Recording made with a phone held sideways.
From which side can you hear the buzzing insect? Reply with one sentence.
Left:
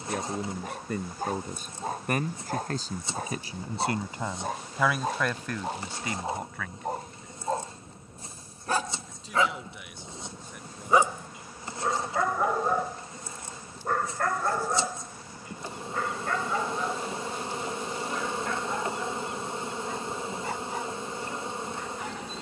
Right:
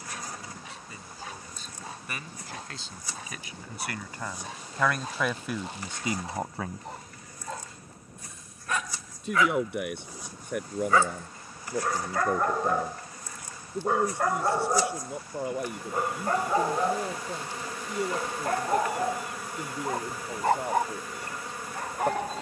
In this clip you hear the buzzing insect on the left.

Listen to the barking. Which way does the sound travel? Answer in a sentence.
In this clip you hear the barking go from the left side to the right.